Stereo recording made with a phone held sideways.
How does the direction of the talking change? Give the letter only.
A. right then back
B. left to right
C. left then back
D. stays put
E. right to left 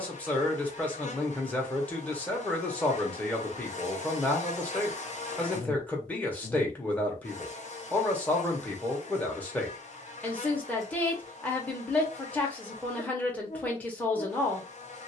D.